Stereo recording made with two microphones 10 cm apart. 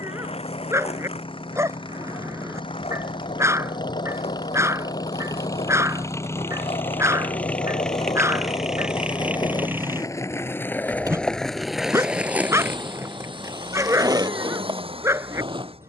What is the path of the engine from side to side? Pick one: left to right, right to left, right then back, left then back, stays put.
left to right.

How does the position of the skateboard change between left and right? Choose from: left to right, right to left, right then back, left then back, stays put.
left to right.